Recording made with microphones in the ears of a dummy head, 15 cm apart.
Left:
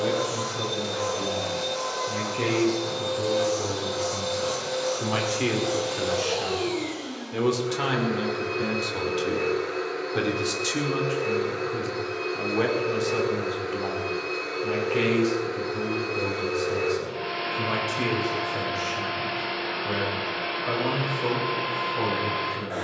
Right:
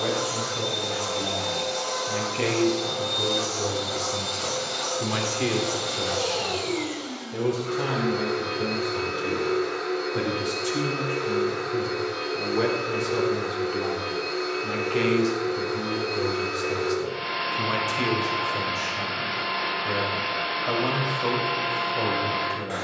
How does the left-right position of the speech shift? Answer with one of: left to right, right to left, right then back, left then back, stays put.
left then back.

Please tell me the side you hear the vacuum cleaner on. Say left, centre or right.
right.